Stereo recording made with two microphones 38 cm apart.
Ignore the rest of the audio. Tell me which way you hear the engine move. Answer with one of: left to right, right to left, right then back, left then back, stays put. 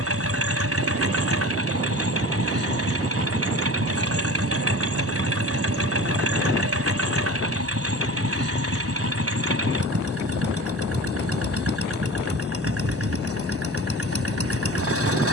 stays put.